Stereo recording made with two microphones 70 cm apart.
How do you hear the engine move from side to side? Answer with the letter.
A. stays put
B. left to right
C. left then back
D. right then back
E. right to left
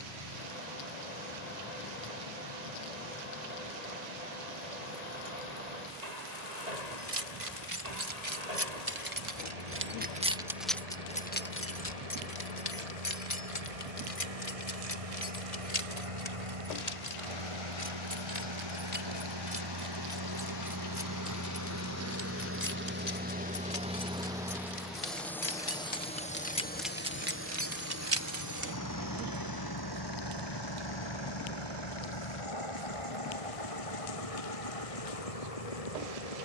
E.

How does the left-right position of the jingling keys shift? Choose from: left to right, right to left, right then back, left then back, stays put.
left then back.